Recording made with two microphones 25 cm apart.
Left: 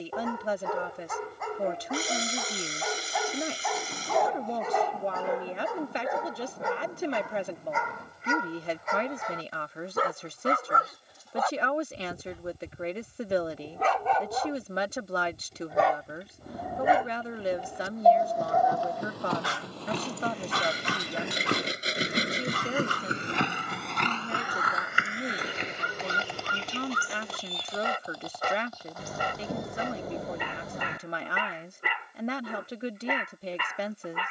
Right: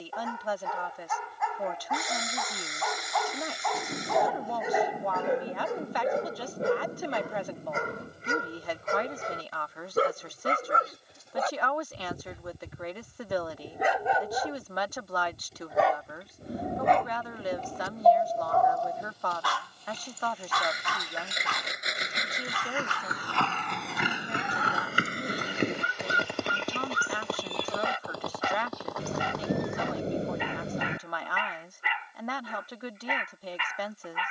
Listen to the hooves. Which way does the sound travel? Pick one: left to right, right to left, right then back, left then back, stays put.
left to right.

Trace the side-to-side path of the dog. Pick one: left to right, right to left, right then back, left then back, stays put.
right then back.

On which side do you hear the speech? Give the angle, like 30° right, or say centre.
30° left.